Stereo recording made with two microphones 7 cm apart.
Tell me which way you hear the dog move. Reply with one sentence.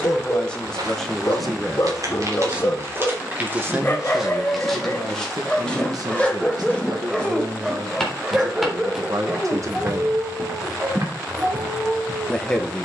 You can hear the dog travel towards the right.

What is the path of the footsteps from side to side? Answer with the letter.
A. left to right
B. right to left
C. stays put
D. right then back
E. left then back
E.